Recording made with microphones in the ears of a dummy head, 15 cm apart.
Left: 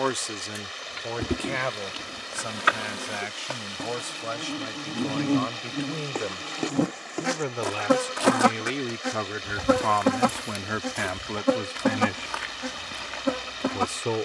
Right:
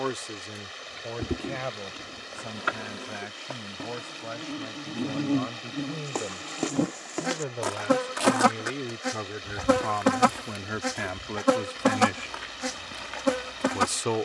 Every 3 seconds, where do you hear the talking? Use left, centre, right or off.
left, left, left, left, right.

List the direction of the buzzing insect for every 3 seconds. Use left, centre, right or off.
left, left, centre, right, right.